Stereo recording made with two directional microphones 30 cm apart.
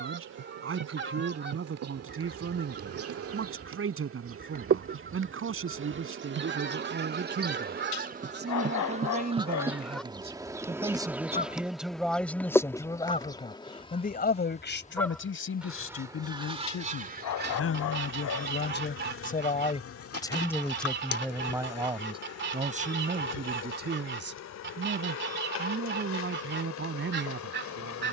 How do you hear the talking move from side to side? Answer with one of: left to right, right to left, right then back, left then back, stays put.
left then back.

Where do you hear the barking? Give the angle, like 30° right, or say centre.
70° left.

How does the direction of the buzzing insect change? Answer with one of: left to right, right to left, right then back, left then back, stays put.
right to left.